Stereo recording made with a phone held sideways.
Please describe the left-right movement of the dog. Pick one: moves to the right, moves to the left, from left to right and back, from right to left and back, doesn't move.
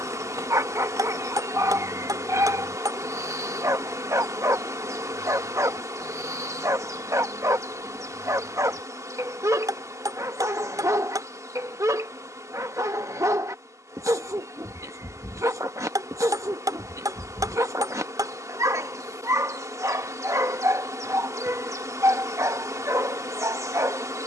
doesn't move.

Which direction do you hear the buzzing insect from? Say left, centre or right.
right.